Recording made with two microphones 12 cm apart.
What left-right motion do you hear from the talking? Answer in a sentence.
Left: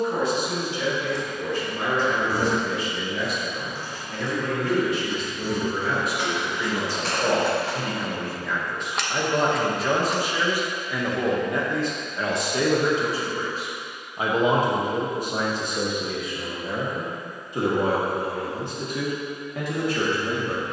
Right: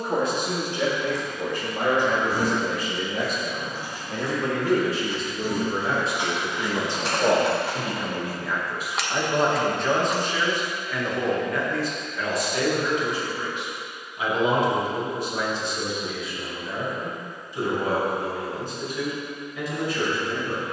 In this clip you hear the talking move to the left.